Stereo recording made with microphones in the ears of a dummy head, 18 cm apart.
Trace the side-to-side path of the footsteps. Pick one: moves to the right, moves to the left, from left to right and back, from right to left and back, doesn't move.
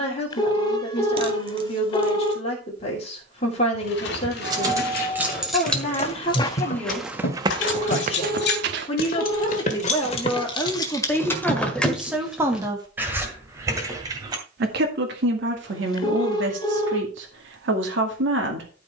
moves to the right.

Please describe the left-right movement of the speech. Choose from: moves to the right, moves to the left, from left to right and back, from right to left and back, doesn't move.
moves to the right.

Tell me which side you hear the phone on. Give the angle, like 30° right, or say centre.
20° left.